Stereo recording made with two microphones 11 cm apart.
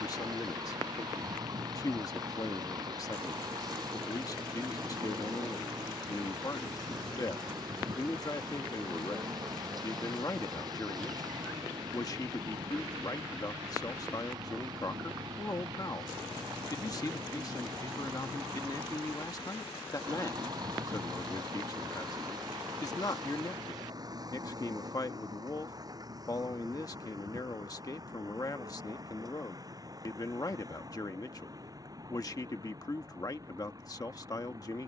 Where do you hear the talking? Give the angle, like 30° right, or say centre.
40° left.